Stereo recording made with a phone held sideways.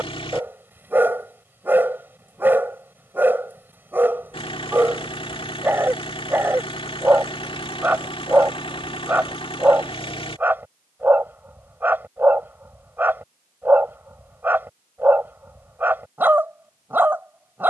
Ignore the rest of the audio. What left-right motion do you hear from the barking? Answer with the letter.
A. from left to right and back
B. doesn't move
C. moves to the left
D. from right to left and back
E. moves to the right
B.